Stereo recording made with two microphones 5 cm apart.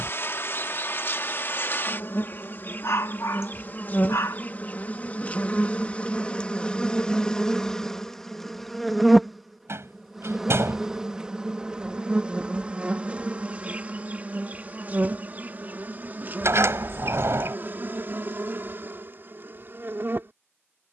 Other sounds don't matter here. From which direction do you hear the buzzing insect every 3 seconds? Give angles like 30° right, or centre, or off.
50° left, 40° left, 10° left, 10° right, 30° right, 40° right, 50° right.